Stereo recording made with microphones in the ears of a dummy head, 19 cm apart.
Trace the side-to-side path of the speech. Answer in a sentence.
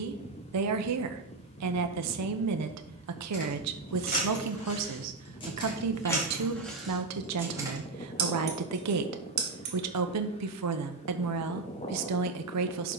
In this clip you hear the speech stay put.